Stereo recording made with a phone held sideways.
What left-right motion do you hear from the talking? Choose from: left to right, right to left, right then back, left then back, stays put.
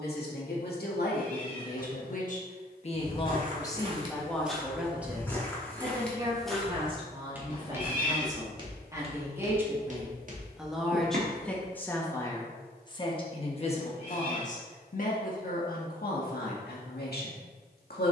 right then back.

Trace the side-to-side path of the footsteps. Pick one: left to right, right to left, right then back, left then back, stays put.
left then back.